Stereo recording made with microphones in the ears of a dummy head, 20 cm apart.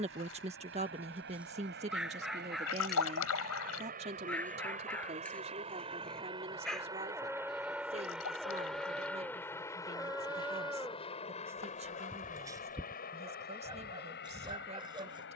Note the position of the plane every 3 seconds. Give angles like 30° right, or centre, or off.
50° right, 40° right, 10° right, 20° left, 40° left.